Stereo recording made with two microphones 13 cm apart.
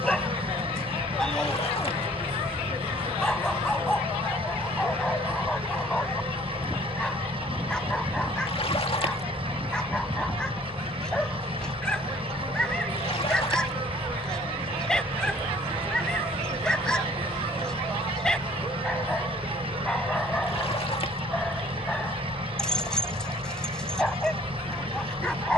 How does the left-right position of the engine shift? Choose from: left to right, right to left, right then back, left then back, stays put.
stays put.